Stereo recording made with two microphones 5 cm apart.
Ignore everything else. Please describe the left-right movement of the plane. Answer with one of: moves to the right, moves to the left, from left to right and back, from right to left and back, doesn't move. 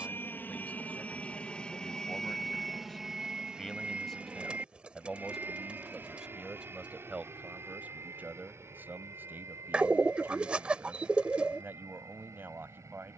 moves to the right.